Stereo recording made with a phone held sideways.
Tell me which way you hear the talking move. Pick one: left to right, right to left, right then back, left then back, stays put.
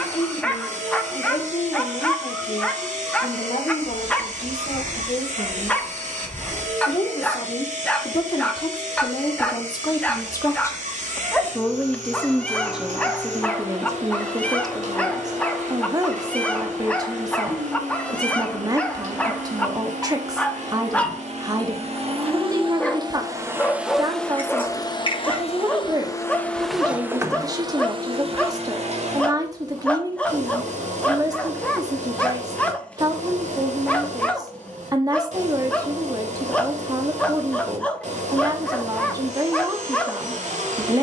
left to right.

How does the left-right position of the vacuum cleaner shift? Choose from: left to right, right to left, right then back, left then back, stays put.
left then back.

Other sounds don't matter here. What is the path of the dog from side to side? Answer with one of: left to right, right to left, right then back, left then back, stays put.
stays put.